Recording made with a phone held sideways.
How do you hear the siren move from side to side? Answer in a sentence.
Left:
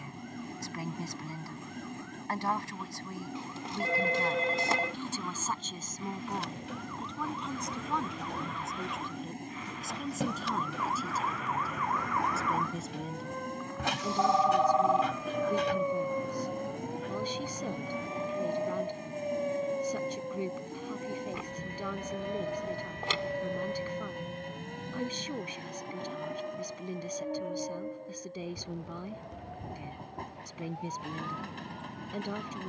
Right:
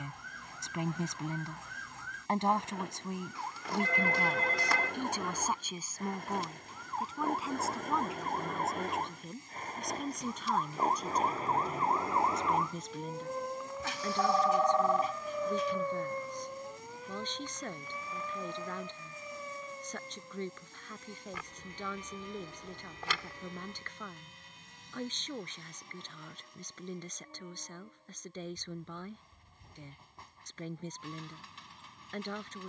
You can hear the siren go from the right side to the left.